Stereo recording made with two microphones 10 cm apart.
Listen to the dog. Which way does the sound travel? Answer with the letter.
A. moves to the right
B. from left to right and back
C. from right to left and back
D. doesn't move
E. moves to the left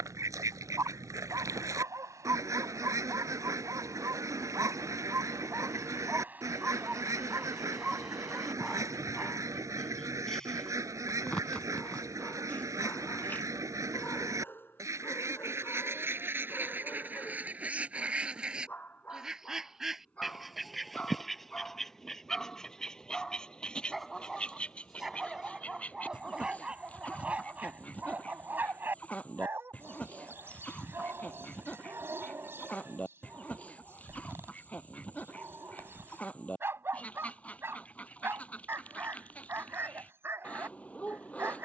C.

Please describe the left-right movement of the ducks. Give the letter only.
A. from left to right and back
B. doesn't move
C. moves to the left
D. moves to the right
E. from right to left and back
C.